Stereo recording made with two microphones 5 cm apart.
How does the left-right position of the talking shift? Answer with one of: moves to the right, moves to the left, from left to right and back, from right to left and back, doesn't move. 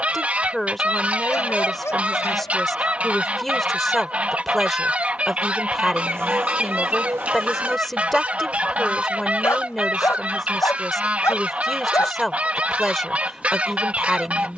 doesn't move.